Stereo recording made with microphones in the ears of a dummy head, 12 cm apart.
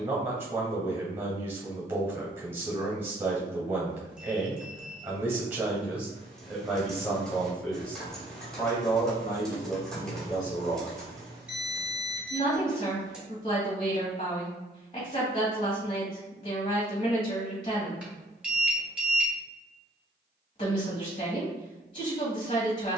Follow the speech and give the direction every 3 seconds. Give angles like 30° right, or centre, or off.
20° right, 20° right, 10° left, 30° left, 40° left, 40° left, 40° left, 40° left.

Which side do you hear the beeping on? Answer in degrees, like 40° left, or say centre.
10° right.